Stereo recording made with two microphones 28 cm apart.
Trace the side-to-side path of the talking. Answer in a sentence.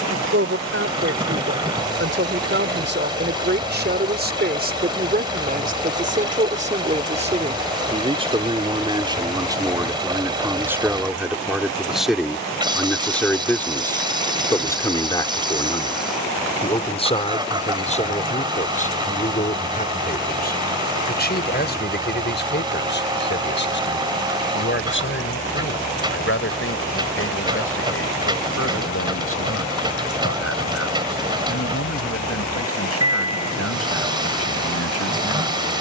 In this clip you hear the talking travel towards the left.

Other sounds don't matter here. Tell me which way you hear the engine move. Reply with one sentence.
In this clip you hear the engine stay in one place.